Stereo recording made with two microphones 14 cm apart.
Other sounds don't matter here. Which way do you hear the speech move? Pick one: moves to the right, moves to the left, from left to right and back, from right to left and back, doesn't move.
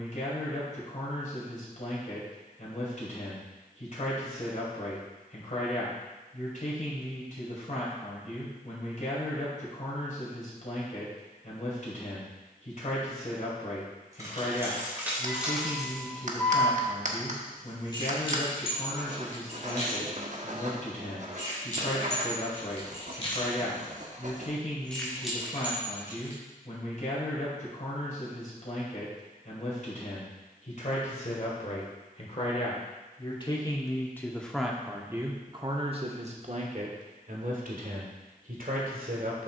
moves to the right.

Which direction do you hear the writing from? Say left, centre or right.
right.